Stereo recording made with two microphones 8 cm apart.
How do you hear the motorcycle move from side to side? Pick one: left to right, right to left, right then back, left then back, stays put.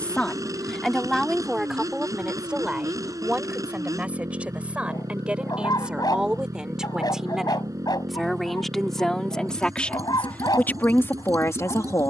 stays put.